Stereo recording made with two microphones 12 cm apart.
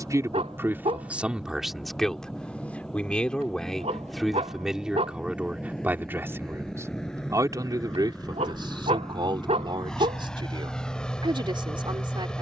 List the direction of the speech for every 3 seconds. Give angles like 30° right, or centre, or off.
10° right, centre, 30° right, 40° right.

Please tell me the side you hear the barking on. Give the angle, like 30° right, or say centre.
60° right.